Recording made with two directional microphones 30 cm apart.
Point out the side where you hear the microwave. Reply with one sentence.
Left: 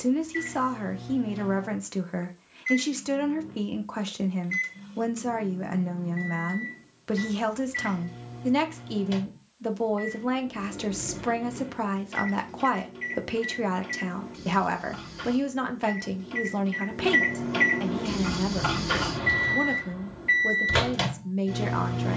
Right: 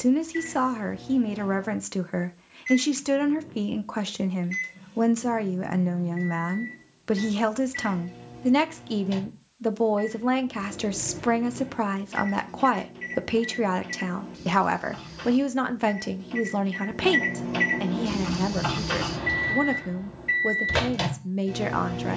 You can hear the microwave in the centre.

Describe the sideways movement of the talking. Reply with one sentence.
In this clip you hear the talking stay put.